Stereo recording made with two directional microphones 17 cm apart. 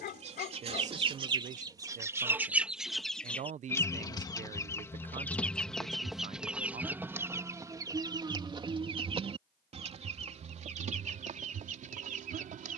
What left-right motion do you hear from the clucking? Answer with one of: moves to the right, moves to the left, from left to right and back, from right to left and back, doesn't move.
from right to left and back.